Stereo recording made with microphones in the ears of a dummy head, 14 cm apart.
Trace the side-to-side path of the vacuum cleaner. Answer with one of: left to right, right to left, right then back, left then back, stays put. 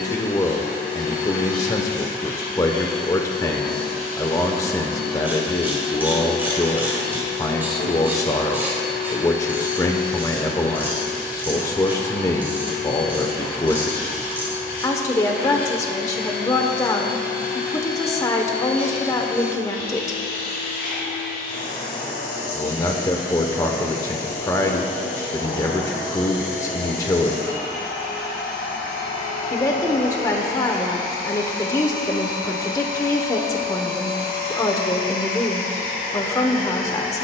stays put.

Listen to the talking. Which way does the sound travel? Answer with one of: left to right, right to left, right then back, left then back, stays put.
stays put.